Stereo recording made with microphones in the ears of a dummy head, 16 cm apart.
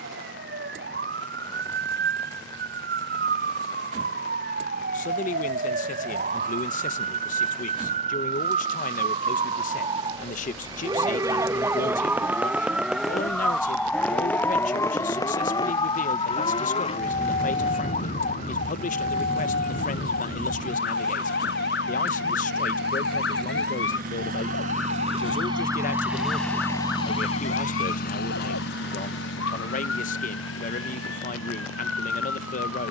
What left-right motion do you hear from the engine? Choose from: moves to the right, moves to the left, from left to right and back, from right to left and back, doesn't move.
moves to the left.